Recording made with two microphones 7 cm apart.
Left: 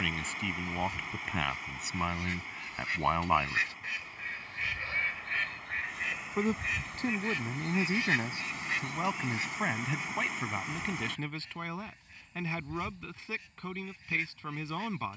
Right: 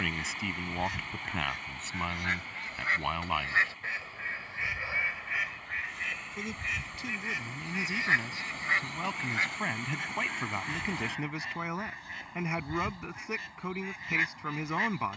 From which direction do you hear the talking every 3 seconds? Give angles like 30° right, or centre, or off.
centre, 20° left, 30° left, centre, 20° right.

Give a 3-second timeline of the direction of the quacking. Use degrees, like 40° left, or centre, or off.
70° right, 30° right, 20° right, 70° right, 70° right.